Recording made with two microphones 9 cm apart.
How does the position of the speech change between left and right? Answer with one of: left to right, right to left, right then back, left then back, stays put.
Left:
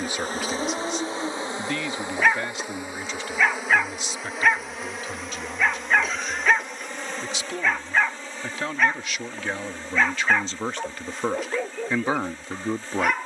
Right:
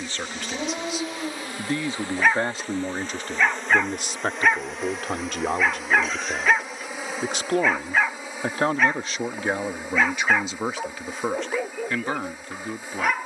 right then back.